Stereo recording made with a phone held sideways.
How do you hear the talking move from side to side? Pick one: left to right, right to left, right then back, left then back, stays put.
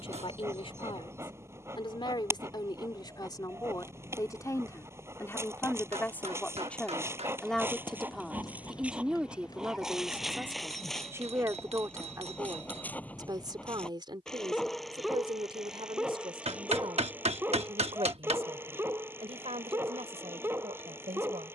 left to right.